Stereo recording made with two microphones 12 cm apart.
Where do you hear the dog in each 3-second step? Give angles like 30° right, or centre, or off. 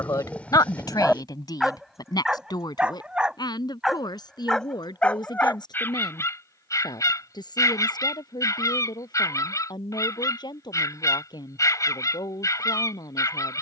centre, 10° left, 30° left, 30° left, 30° left.